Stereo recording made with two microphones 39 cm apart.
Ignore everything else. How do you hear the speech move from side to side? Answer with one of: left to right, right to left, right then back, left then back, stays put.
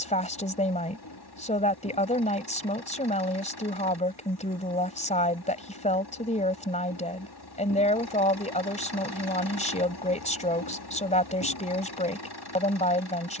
stays put.